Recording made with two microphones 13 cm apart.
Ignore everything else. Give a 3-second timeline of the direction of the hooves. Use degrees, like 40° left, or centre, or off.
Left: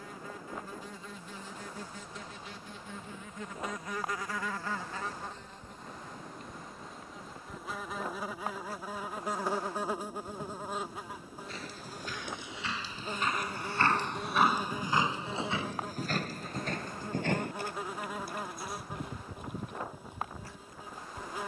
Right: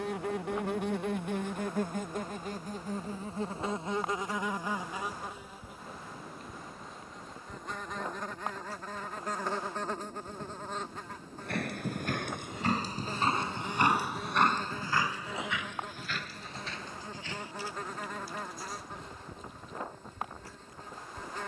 off, off, off, 60° right, 20° right, 40° left, 60° left.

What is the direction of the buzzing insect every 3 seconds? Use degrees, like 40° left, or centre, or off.
60° right, 20° right, centre, 10° left, 10° left, 10° left, 10° left.